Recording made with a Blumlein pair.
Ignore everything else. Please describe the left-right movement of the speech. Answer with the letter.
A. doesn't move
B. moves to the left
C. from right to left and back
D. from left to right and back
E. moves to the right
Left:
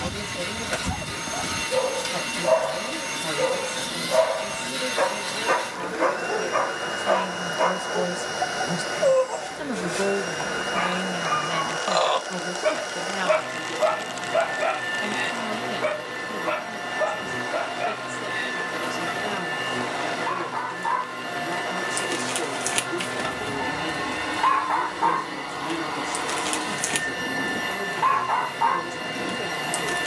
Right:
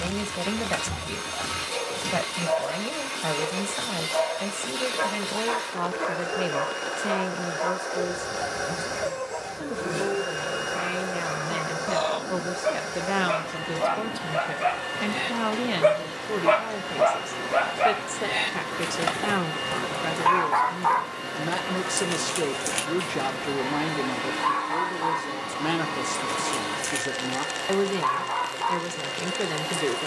C.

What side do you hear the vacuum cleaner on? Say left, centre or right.
centre.